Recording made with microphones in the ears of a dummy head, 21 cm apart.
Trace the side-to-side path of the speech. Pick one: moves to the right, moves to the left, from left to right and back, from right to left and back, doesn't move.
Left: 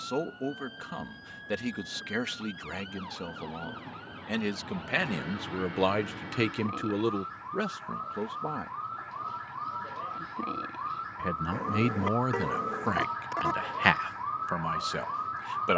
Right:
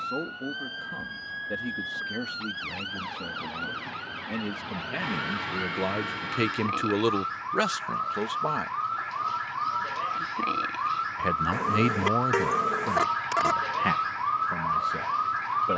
from left to right and back.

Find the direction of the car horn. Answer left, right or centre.
right.